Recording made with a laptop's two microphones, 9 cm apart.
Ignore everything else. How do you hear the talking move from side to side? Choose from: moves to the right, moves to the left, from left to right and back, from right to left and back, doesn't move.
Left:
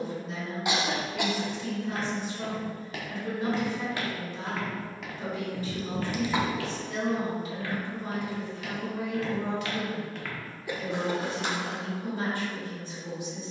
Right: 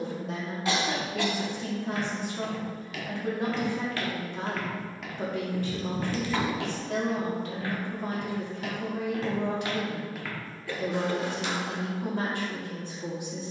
doesn't move.